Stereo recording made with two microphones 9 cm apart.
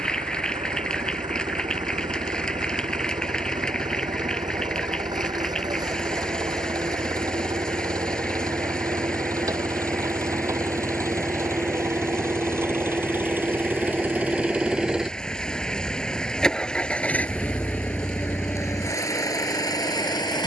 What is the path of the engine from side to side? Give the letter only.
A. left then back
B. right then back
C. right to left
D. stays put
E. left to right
C.